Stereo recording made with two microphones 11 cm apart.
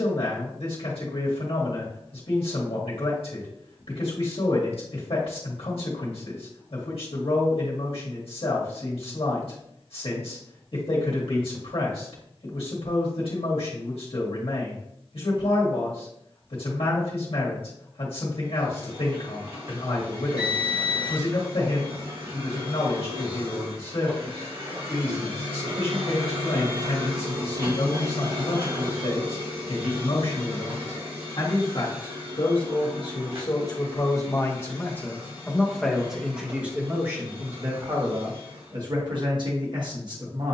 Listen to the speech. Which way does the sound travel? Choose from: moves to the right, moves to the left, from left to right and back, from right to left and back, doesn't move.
moves to the right.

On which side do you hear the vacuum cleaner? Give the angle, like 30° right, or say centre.
60° right.